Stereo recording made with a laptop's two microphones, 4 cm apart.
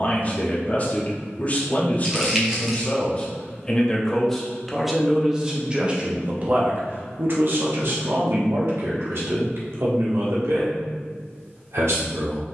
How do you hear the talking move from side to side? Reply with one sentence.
You can hear the talking go from the left side to the right.